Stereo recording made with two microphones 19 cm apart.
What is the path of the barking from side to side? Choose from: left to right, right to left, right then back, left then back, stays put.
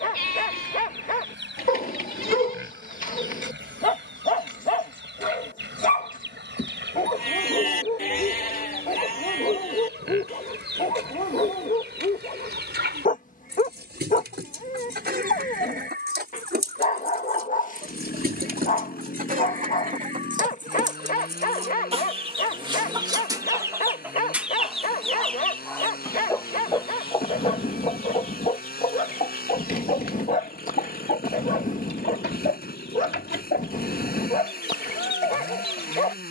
stays put.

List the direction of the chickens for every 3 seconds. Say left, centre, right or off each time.
right, right, right, right, right, right, right, right, centre, left, left, left.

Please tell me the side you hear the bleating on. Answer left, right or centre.
left.